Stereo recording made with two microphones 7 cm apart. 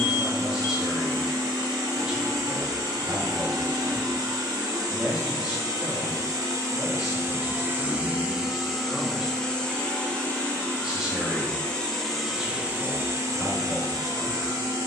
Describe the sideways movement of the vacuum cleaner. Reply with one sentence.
You can hear the vacuum cleaner move from right to left and back again.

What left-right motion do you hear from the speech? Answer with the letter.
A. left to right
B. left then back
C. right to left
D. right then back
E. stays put
E.